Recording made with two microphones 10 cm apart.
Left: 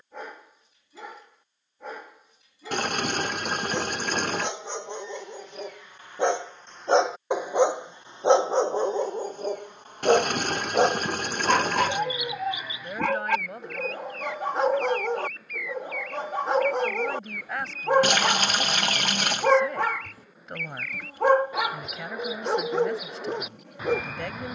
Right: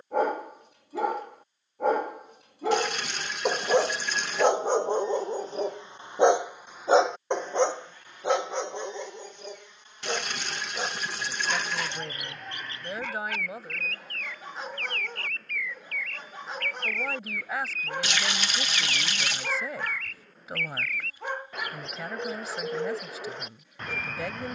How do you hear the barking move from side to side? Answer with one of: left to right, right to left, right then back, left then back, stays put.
right to left.